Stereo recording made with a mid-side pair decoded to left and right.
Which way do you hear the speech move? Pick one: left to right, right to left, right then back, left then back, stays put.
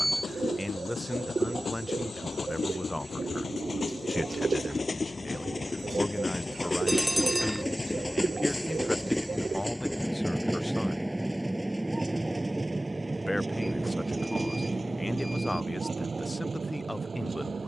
stays put.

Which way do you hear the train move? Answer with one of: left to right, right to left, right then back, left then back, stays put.
left to right.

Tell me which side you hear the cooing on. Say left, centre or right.
right.